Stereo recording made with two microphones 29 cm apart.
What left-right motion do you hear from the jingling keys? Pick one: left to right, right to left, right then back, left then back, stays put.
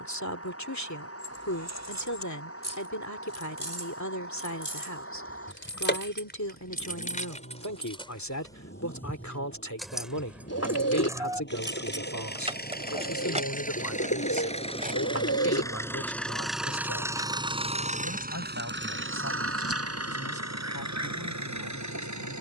left to right.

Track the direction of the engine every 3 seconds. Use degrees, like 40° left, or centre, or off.
50° left, 50° left, 50° left, 40° left, 30° left, centre, 50° right, 80° right.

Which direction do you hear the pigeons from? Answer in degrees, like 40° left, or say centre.
60° left.